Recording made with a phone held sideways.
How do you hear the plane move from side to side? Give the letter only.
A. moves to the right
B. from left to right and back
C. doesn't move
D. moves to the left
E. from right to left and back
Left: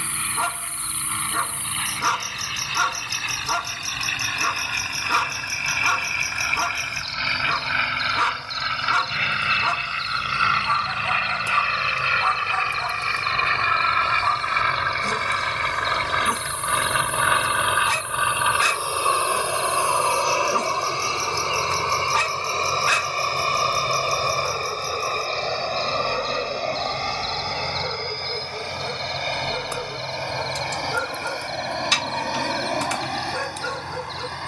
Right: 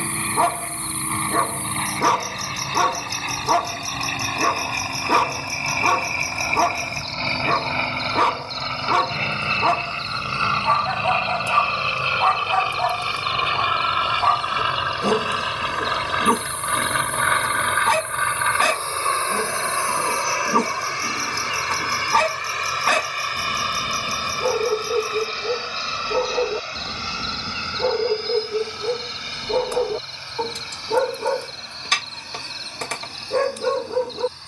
D.